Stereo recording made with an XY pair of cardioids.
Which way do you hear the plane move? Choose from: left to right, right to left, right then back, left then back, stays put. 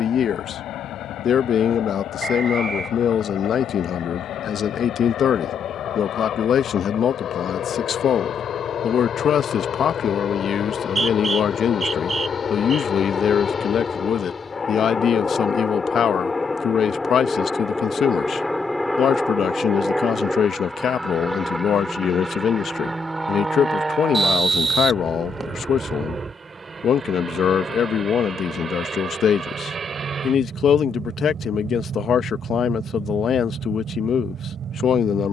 left to right.